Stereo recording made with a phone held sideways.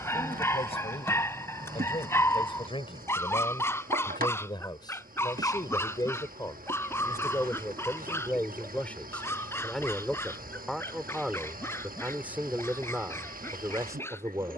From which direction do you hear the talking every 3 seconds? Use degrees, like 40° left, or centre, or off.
40° left, 30° left, 10° left, centre, 20° right.